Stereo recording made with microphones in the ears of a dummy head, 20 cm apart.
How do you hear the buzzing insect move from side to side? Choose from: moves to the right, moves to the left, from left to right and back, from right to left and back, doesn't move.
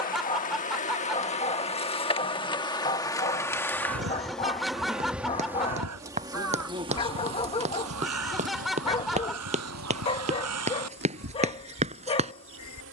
moves to the right.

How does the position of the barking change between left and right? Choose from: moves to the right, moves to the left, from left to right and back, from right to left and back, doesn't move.
doesn't move.